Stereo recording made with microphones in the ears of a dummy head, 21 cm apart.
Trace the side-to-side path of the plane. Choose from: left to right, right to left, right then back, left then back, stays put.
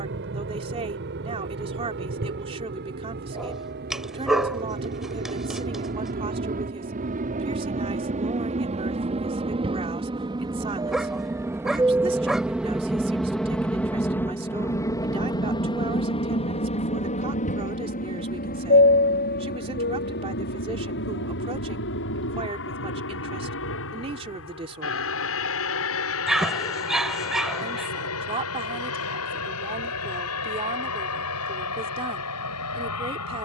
right to left.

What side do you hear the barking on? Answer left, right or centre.
centre.